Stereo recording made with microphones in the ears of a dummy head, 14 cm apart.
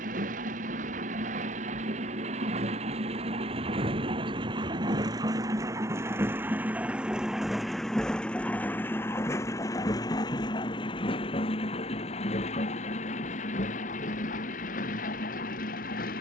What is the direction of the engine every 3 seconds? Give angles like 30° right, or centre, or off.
50° right, 30° right, centre, 30° left, 50° left, 60° left.